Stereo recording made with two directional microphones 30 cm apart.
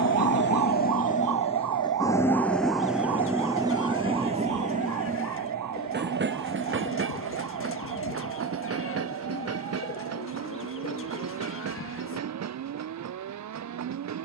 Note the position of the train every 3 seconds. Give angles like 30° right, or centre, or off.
20° left, 20° right, 40° right, 50° right, 60° right.